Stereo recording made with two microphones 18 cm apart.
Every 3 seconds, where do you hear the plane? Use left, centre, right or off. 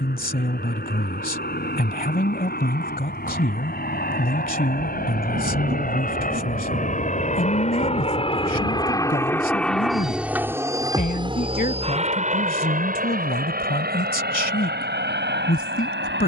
left, left, left, centre, right, right.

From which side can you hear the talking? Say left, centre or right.
left.